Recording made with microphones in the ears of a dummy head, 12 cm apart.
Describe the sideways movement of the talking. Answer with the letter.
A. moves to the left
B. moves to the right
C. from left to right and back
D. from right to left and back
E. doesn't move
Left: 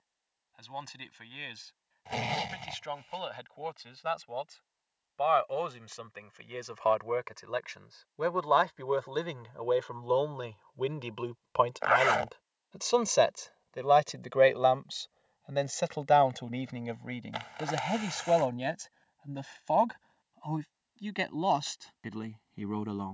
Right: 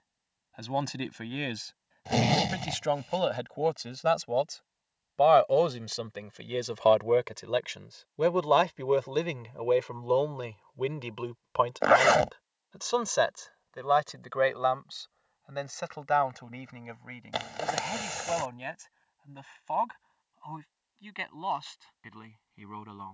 A.